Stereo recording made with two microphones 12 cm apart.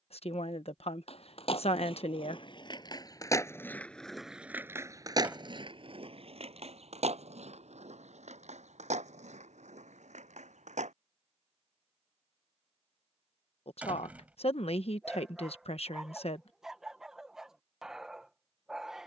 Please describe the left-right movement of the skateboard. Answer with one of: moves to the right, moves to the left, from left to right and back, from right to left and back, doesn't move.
moves to the right.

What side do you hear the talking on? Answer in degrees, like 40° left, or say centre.
60° left.